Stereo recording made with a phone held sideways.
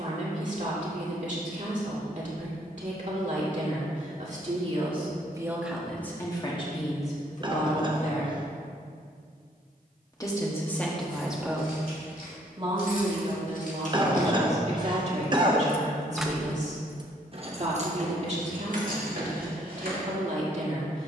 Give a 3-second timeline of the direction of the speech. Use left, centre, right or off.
right, right, left, centre, right, right, right.